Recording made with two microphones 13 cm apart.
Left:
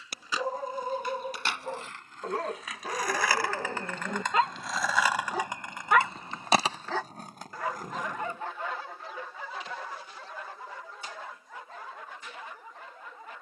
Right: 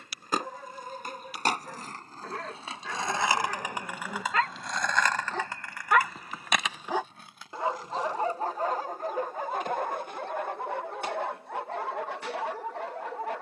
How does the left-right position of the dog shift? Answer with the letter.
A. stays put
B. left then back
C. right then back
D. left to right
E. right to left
D.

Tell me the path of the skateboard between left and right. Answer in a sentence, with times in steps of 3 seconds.
You can hear the skateboard on the right from 0 s, in the centre from 3 s, on the left from 6 s and not at all from 9 s.